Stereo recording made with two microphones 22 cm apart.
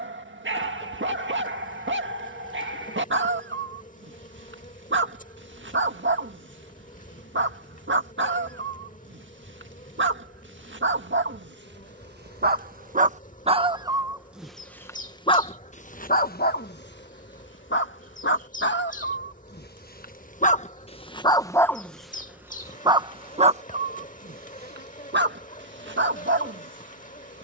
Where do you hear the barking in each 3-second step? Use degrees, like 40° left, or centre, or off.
60° right, 60° right, 60° right, 60° right, 30° right, 50° left, 50° left, 10° right, 50° right.